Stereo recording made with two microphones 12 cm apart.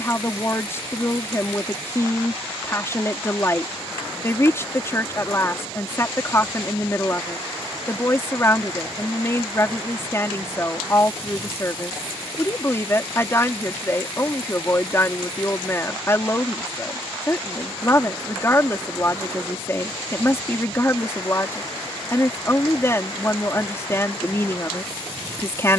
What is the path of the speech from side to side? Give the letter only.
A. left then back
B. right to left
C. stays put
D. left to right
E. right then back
C.